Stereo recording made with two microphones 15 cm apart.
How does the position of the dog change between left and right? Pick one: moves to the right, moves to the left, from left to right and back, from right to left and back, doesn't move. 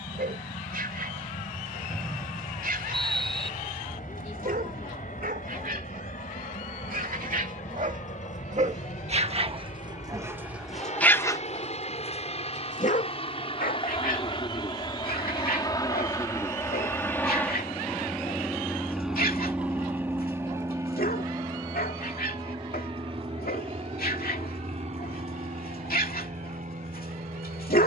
moves to the left.